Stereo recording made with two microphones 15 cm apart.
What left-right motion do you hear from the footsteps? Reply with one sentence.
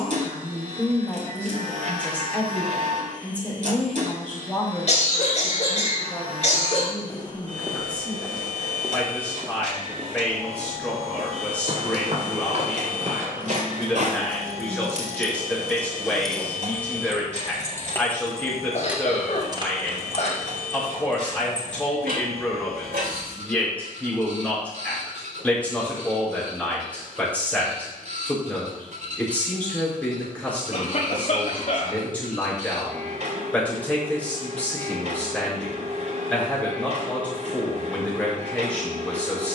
You can hear the footsteps move from left to right.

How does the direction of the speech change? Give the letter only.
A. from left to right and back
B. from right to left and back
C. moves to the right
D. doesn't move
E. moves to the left
D.